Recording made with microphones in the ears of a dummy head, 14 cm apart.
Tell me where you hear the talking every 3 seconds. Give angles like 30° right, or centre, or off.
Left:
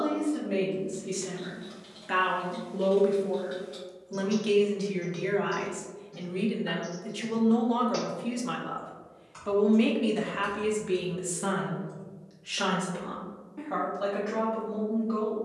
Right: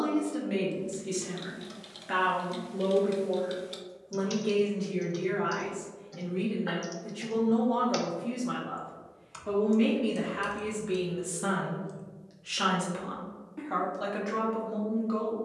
10° right, 60° left, 60° left, 20° left, 20° right.